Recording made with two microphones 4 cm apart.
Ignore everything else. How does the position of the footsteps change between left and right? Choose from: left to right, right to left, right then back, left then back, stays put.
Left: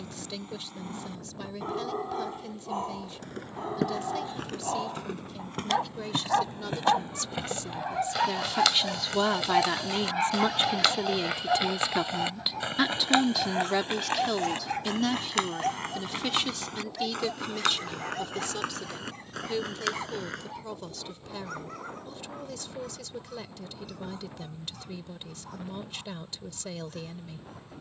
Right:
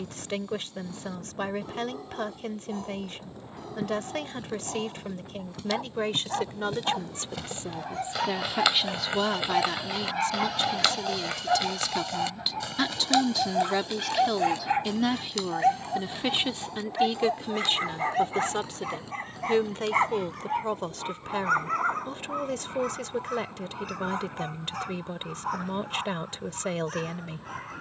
right then back.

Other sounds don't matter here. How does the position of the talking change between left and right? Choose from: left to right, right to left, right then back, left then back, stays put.
left then back.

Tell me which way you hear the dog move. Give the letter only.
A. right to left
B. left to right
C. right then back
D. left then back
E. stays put
B.